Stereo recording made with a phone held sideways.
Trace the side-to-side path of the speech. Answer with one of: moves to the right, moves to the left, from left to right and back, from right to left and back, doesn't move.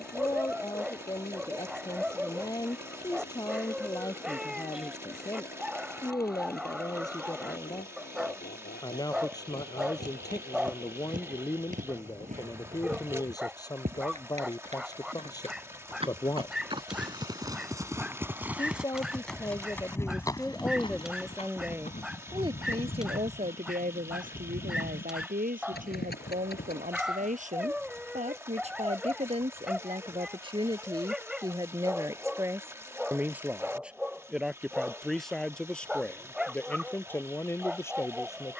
from left to right and back.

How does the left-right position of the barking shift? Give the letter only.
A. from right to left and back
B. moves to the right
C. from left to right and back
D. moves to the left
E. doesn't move
E.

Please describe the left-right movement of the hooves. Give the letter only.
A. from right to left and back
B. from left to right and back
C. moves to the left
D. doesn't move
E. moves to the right
C.